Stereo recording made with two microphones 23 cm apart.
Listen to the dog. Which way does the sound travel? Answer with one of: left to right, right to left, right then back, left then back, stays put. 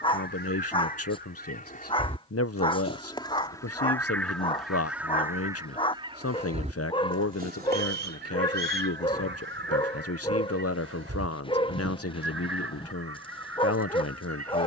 stays put.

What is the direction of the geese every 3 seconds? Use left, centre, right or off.
left, centre, right, right, right.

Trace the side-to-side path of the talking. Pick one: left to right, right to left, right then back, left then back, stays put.
stays put.